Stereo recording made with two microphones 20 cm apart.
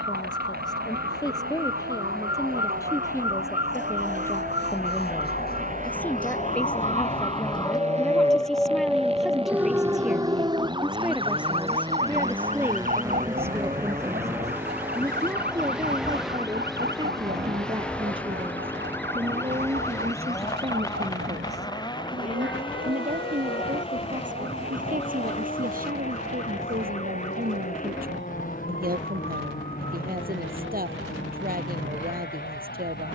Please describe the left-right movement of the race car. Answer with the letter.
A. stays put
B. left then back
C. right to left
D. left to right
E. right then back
C.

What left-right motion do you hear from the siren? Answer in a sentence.
In this clip you hear the siren travel towards the right.